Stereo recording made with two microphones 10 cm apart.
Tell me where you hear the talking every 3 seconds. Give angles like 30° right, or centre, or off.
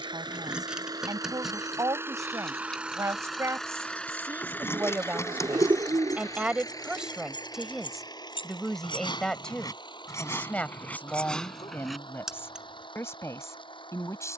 40° right, 30° right, centre, 10° left, 30° left.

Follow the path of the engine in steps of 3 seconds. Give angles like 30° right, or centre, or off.
30° right, 20° left, 40° left, 50° left, 60° left.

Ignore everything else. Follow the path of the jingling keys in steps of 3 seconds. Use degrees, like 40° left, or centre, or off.
centre, 20° left, 60° left, 30° left, 10° right.